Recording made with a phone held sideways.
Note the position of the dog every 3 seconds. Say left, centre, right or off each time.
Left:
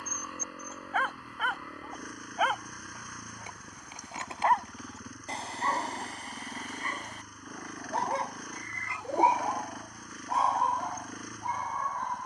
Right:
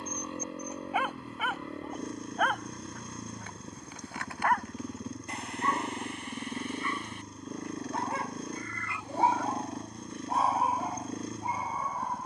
centre, left, left, centre.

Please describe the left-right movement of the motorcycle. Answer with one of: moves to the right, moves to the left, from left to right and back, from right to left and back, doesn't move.
doesn't move.